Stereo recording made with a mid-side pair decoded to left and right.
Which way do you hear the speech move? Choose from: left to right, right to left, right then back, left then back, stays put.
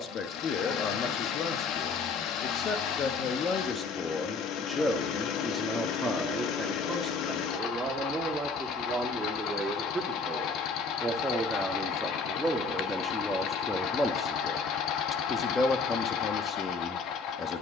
right then back.